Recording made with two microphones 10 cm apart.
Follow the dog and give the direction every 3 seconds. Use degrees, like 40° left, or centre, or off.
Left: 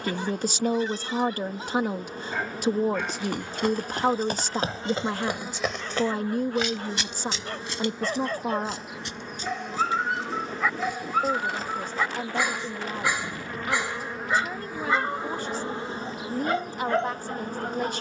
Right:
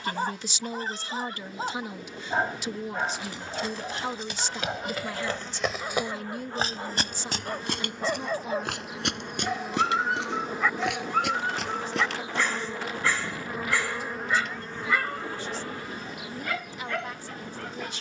40° right, 30° right, 10° right, centre, 20° left, 30° left.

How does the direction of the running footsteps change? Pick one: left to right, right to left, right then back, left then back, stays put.
left to right.